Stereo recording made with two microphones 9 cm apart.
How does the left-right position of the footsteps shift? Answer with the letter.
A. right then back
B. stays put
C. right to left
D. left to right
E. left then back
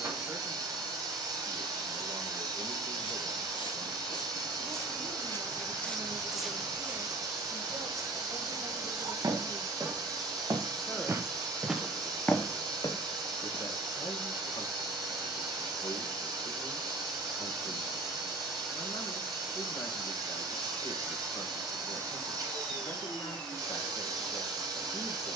A.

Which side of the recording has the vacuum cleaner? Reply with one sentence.
In this clip you hear the vacuum cleaner on the right.